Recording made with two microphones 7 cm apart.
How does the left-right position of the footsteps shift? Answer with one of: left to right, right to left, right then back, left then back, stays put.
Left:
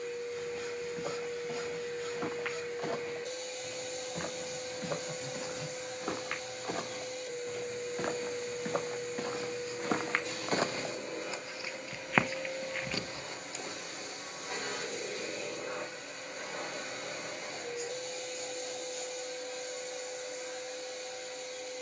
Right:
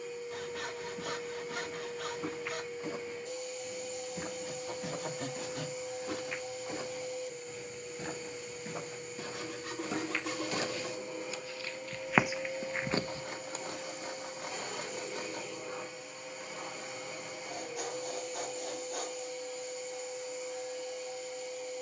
left to right.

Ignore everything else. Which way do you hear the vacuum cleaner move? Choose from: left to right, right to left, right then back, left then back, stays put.
stays put.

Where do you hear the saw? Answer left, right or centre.
right.